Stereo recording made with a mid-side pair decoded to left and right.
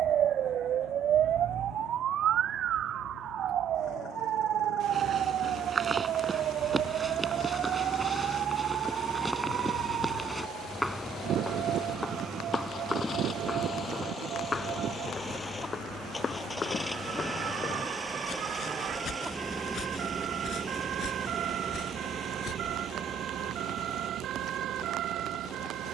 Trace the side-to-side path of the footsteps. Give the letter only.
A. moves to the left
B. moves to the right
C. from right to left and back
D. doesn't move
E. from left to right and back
A.